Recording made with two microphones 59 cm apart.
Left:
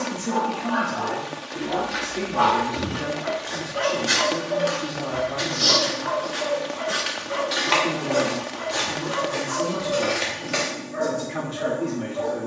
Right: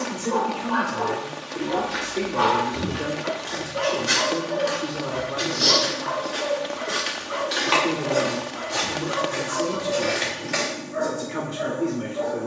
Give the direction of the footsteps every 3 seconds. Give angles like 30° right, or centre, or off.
20° right, 10° left, 10° left, 20° right.